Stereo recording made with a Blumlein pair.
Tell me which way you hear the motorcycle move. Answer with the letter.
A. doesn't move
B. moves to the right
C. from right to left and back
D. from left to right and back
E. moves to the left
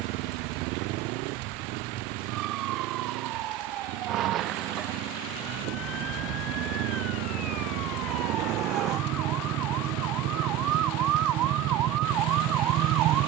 A.